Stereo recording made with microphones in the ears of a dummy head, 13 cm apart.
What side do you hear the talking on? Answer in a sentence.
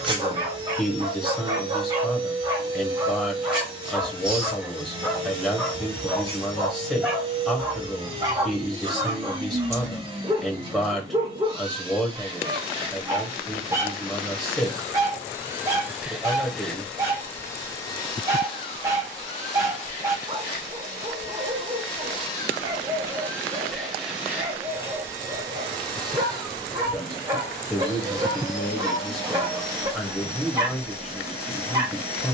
You can hear the talking in the centre.